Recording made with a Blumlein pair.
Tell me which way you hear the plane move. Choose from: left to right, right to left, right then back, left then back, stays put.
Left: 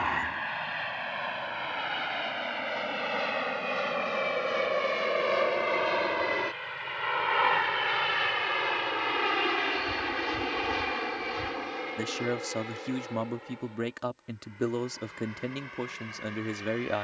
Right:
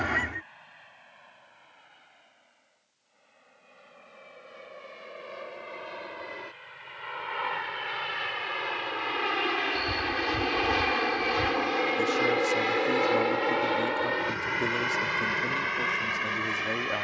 left to right.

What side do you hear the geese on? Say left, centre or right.
right.